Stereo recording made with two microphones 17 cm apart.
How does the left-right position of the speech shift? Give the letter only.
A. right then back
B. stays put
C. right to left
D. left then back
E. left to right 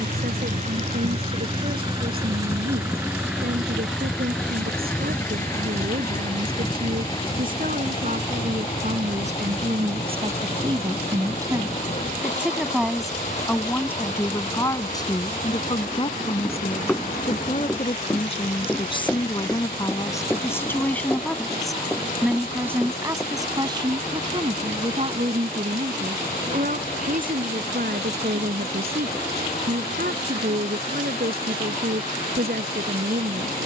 D.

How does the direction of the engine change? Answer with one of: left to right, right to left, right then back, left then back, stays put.
right to left.